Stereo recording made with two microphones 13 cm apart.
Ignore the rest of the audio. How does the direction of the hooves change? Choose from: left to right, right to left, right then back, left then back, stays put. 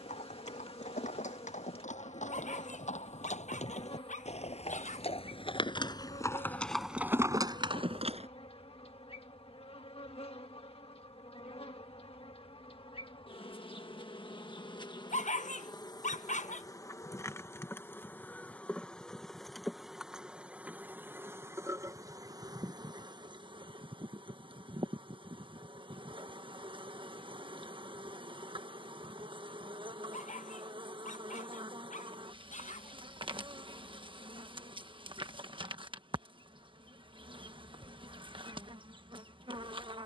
left to right.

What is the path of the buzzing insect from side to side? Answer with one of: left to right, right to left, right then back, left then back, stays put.
left to right.